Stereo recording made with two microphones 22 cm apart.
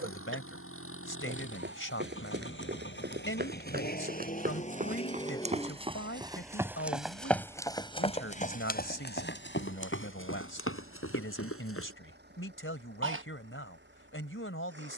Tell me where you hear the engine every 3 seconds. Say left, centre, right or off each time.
left, left, centre, right, right.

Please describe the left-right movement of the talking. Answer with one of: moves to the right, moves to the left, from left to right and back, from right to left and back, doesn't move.
doesn't move.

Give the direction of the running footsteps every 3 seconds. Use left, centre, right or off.
right, right, centre, left, off.